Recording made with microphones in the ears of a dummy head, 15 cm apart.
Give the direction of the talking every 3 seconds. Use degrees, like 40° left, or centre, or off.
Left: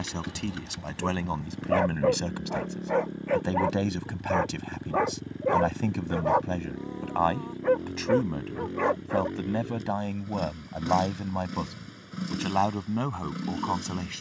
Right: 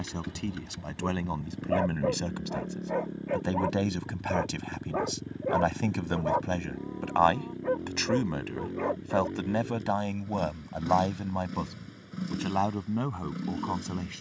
10° left, 10° right, 30° right, 10° right, 20° left.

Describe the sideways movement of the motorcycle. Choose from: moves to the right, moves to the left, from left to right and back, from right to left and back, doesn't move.
doesn't move.